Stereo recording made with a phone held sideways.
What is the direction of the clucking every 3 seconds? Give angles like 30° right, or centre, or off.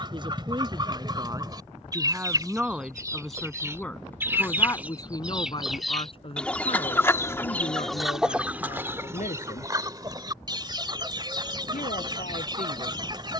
30° right, 10° right, centre, 30° right, 30° right.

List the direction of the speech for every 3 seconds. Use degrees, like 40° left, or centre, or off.
20° right, 20° left, 50° left, 70° left, 70° left.